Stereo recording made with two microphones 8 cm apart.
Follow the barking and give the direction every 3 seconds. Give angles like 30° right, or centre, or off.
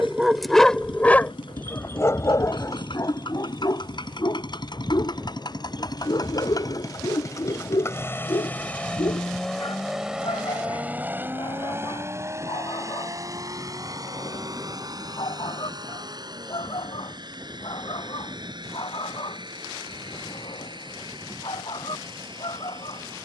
20° left, 50° left, 60° left, 70° left, 70° left, 70° left, 70° left, 80° left.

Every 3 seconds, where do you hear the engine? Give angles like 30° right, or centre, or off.
80° left, 60° left, 40° left, 10° right, 40° right, 60° right, 60° right, 70° right.